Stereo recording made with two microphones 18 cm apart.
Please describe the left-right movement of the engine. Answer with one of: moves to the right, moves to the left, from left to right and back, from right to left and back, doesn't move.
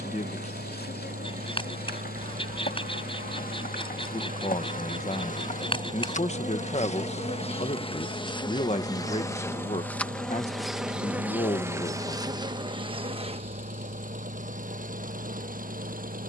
doesn't move.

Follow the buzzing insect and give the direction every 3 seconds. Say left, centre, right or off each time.
left, left, left, centre, right, right.